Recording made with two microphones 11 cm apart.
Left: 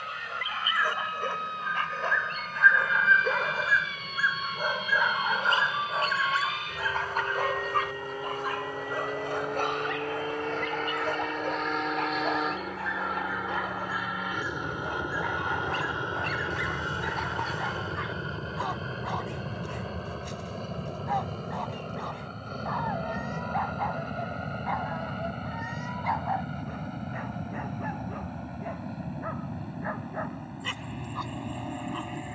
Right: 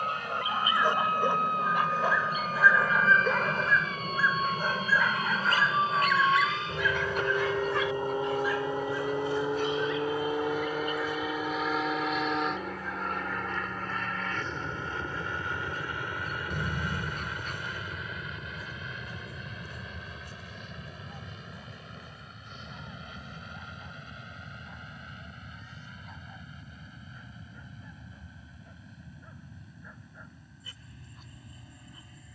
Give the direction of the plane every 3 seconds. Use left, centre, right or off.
right, right, right, centre, centre, left, left, left, left, left, left.